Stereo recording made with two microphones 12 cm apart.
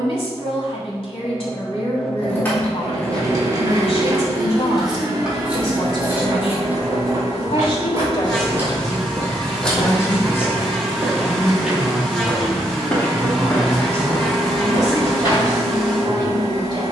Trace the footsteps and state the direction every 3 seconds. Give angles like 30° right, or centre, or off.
off, off, 50° right, 30° right, 20° left, 40° left.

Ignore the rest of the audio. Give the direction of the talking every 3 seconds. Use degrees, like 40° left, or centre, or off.
50° left, 50° left, 40° left, 20° left, 20° right, 40° right.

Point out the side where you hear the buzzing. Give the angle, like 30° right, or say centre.
centre.